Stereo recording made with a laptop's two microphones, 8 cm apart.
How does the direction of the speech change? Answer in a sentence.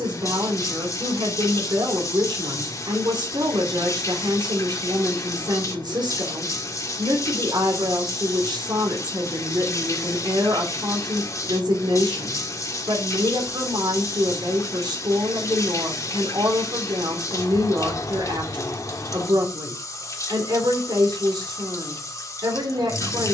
In this clip you hear the speech stay in one place.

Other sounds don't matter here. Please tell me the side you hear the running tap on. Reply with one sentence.
You can hear the running tap on the left.